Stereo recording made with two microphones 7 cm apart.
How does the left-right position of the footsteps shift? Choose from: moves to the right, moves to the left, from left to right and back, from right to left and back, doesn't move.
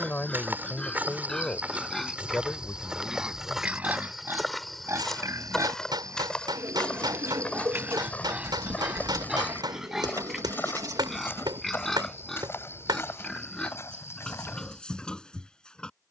moves to the left.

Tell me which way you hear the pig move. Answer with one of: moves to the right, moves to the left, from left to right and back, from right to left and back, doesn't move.
from left to right and back.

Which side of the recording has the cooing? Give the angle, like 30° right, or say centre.
60° right.